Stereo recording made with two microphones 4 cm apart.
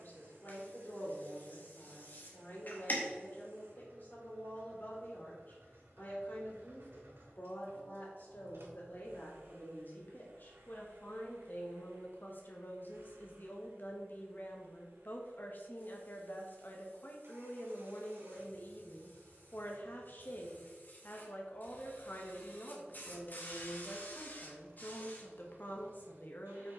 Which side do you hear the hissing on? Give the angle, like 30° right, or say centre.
50° left.